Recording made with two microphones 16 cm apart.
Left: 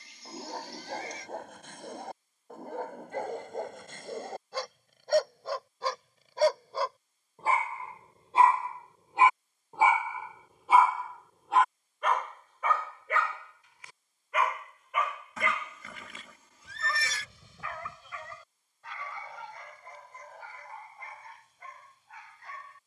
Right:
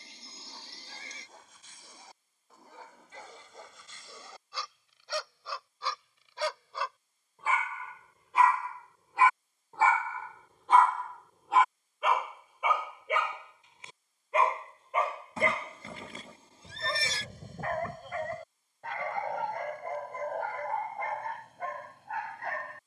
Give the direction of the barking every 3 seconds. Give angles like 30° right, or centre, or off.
60° left, 50° left, 30° left, 10° left, 20° right, 40° right, 60° right, 60° right.